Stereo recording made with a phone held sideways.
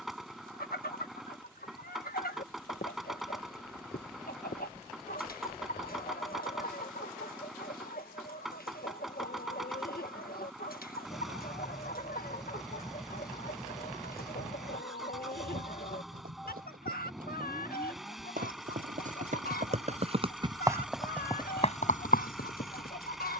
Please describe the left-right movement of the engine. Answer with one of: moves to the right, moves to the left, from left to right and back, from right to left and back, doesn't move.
doesn't move.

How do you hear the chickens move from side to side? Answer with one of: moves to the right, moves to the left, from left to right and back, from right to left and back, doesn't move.
doesn't move.